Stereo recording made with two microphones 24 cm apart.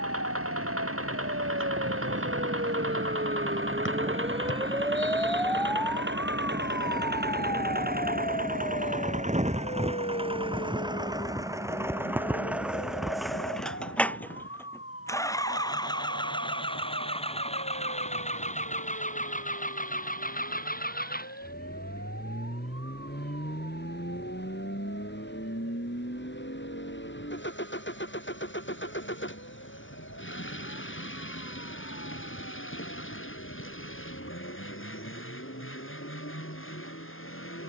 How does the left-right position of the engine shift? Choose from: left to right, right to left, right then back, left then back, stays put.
right to left.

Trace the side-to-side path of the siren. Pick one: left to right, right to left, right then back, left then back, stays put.
right to left.